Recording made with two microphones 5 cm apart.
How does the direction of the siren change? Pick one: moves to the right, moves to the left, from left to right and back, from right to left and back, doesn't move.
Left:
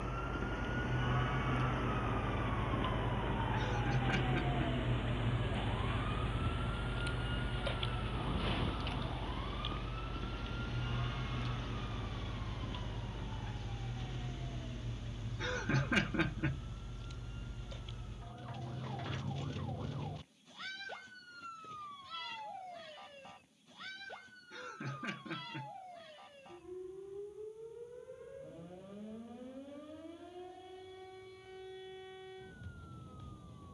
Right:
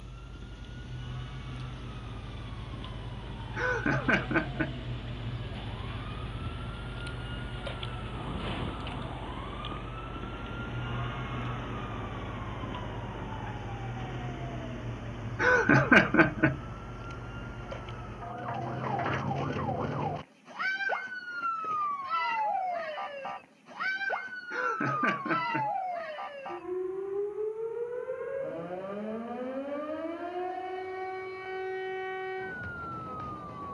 moves to the right.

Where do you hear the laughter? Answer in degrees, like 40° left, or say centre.
60° right.